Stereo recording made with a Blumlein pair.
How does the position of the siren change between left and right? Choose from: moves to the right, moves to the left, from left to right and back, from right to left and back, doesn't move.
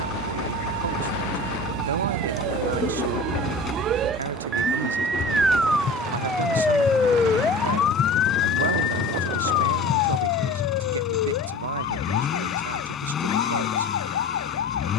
moves to the left.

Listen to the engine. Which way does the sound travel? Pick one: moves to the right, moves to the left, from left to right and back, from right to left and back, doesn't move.
doesn't move.